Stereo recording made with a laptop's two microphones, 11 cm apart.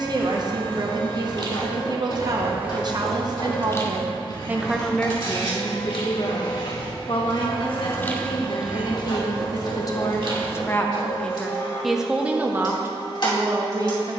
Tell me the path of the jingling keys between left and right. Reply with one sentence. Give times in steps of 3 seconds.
You can hear the jingling keys on the right from 0 s, on the left from 3 s, on the right from 9 s and not at all from 12 s.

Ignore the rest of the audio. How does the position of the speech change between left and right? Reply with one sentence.
In this clip you hear the speech go left and come back.